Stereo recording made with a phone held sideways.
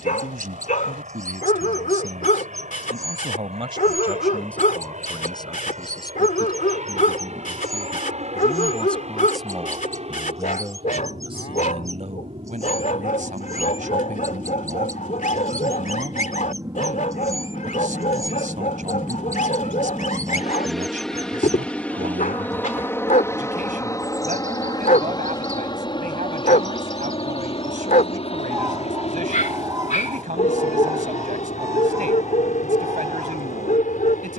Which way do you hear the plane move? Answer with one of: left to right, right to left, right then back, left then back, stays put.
right to left.